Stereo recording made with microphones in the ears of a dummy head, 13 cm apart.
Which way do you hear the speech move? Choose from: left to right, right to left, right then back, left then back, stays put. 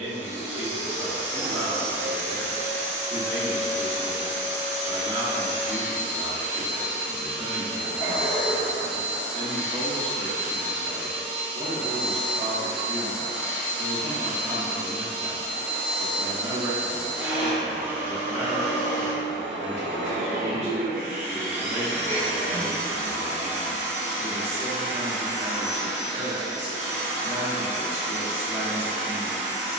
stays put.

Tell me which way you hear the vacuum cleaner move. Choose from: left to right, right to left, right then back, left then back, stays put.
stays put.